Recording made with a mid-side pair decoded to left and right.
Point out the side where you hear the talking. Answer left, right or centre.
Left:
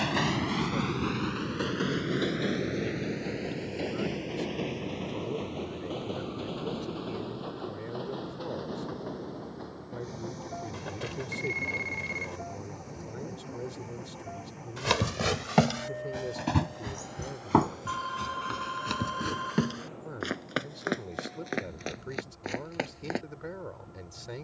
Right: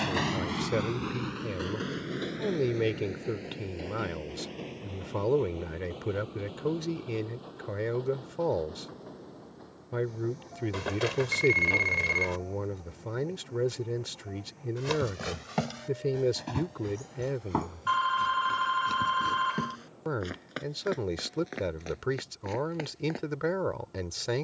right.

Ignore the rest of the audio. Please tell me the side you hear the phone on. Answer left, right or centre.
right.